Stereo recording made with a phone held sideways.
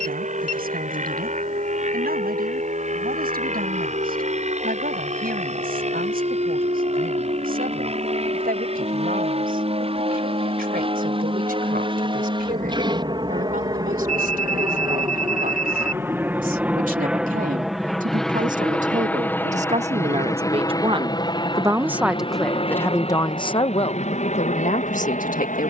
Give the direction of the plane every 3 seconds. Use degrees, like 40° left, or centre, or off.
60° right, 50° right, 50° right, 40° right, 30° right, 10° right, 10° left, 40° left, 50° left.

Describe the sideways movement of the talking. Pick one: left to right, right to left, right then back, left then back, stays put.
right to left.